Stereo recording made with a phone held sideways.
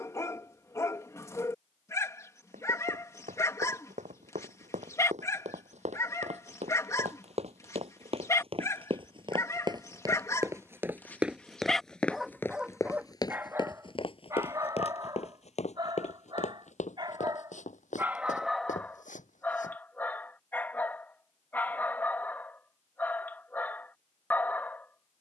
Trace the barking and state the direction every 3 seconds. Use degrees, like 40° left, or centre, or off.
20° left, 20° left, 20° left, 20° left, 20° right, 30° right, 10° left, 10° left, 10° left.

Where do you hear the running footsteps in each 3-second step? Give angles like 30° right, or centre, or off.
70° right, 70° right, 50° right, 20° right, 30° left, 60° left, 70° left, off, off.